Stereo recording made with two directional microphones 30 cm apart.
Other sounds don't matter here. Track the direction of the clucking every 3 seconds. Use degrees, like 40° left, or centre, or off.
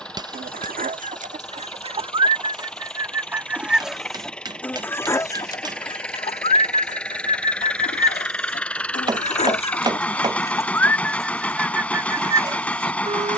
20° right, centre, 30° left, 10° left, 20° right.